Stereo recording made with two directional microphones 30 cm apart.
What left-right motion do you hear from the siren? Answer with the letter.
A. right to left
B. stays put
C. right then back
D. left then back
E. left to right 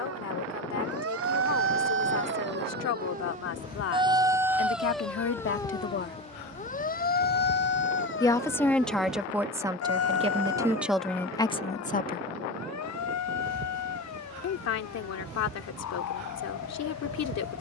A.